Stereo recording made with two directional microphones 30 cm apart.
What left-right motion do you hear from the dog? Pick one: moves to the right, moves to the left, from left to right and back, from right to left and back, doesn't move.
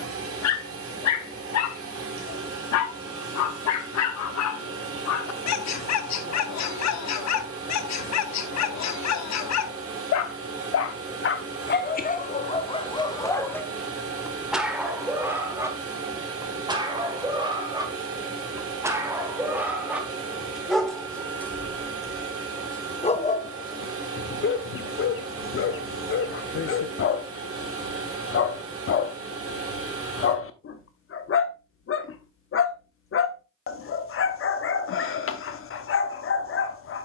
from left to right and back.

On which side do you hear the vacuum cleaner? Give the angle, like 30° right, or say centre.
50° right.